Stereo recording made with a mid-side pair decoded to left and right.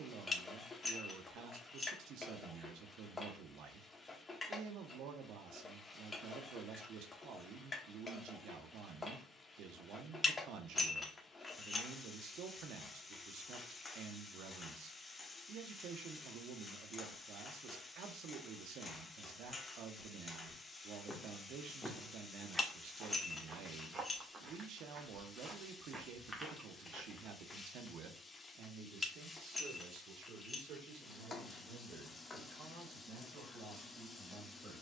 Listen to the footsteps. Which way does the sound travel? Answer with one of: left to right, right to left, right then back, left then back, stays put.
right then back.